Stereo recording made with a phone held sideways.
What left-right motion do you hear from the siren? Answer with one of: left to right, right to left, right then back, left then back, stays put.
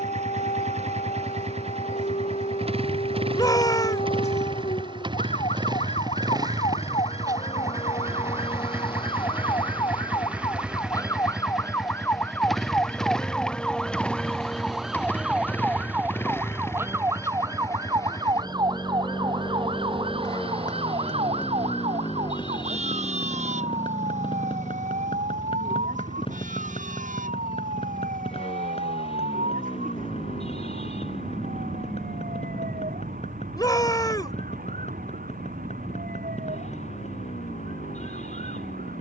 left to right.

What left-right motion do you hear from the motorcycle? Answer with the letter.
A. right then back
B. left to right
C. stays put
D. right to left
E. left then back
D.